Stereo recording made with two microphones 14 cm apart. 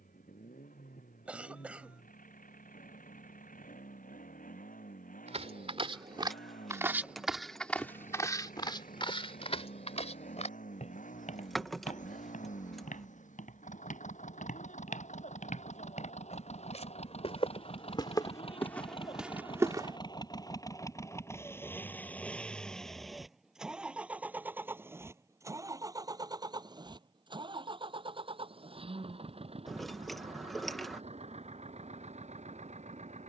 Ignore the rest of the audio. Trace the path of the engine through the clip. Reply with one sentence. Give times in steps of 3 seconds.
In this clip you hear the engine on the left from 0 s, in the centre from 21 s and on the right from 24 s.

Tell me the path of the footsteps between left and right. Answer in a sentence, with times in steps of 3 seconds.
You can hear the footsteps not at all from 0 s, on the right from 3 s, in the centre from 6 s, on the left from 9 s, in the centre from 18 s and not at all from 21 s.